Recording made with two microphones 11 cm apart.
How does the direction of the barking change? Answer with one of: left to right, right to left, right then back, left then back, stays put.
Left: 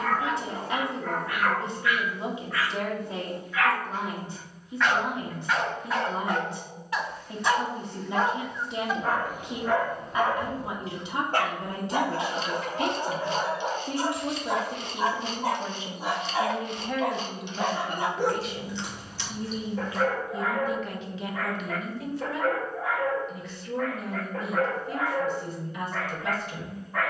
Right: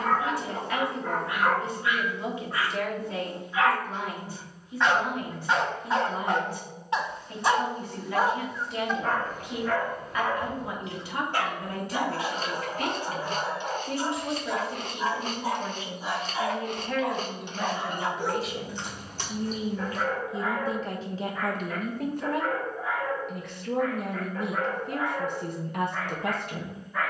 right to left.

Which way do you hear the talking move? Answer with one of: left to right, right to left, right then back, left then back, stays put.
left to right.